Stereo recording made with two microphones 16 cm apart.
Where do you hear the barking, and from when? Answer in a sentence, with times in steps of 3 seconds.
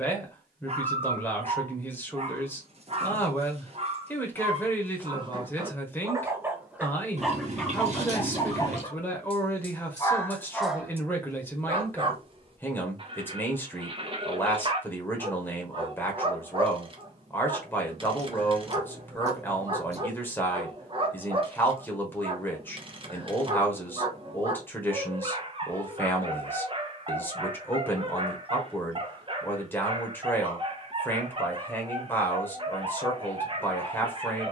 You can hear the barking on the right from 0 s, in the centre from 6 s and on the right from 12 s.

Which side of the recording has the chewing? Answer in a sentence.
You can hear the chewing on the right.